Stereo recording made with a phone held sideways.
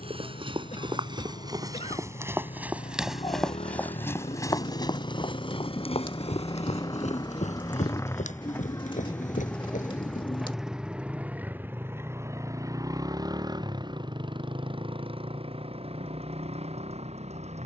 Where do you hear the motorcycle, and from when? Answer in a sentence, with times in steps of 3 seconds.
In this clip you hear the motorcycle on the left from 0 s, in the centre from 9 s and on the right from 12 s.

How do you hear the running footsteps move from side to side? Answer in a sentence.
In this clip you hear the running footsteps move to the left.